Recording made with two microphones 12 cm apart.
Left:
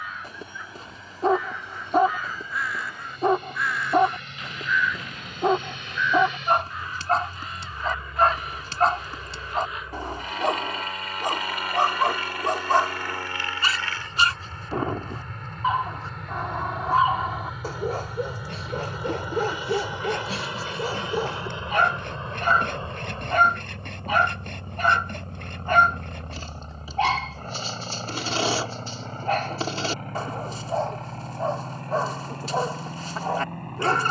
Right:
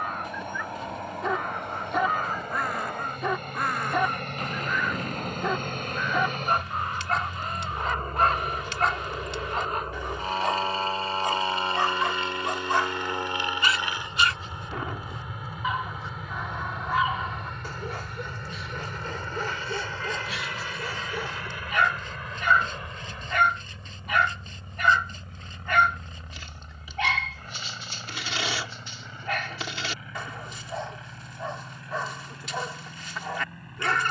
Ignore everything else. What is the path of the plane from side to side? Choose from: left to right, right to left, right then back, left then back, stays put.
right to left.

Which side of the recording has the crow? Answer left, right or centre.
right.